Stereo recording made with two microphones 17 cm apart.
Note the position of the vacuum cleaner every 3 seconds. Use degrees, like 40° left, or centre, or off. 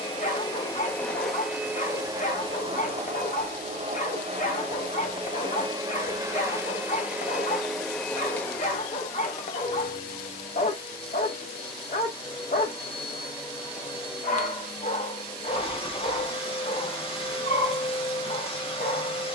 centre, 40° right, centre, 30° left, 30° left, 30° left, 30° left.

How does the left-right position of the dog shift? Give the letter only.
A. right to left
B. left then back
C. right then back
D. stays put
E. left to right
D.